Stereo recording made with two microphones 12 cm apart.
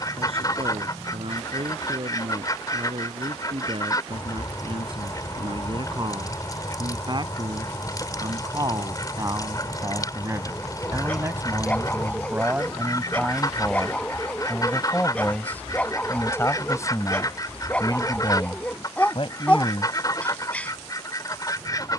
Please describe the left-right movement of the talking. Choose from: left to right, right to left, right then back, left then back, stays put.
right to left.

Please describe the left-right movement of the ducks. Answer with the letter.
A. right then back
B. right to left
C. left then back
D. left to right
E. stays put
E.